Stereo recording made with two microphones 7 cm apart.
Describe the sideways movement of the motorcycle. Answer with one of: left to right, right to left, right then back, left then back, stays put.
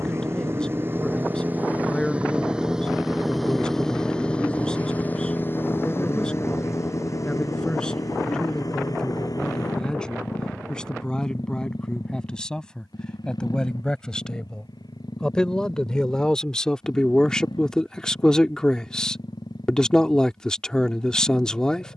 right to left.